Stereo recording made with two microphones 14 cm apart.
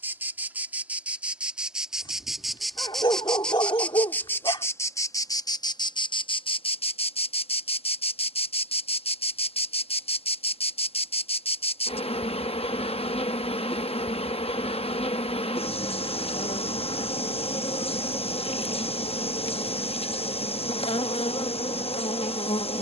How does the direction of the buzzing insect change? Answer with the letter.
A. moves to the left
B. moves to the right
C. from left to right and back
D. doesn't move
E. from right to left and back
A.